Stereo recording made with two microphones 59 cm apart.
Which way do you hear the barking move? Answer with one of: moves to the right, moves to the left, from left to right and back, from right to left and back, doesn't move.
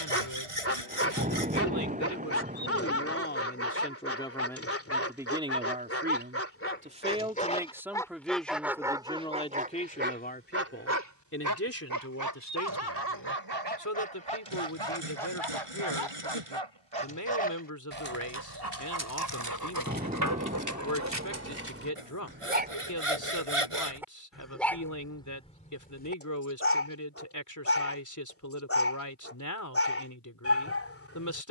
from left to right and back.